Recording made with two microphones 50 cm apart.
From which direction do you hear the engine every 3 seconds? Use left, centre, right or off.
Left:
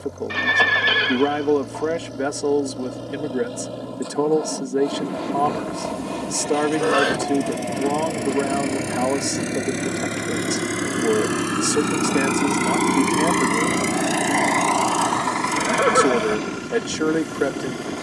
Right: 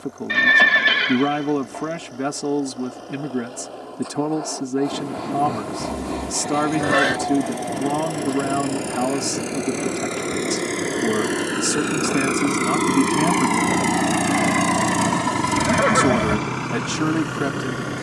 left, left, left, left, centre, right.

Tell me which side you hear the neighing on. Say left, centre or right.
right.